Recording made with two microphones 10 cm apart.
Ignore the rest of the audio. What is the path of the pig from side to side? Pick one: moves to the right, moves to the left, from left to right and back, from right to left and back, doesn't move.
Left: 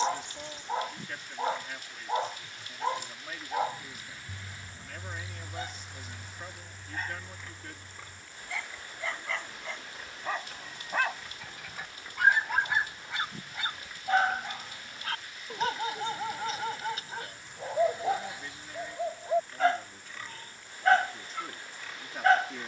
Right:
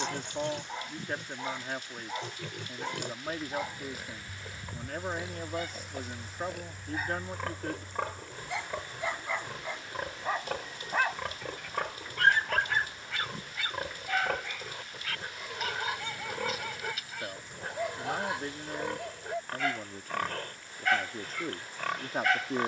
doesn't move.